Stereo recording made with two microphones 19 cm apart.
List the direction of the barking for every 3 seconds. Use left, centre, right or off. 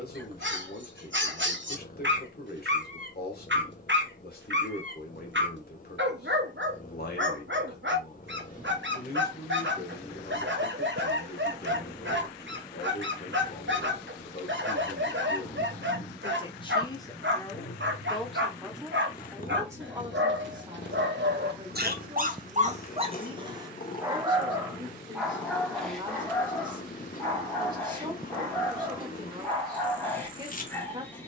right, right, right, right, right, right, right, right, centre, centre, centre.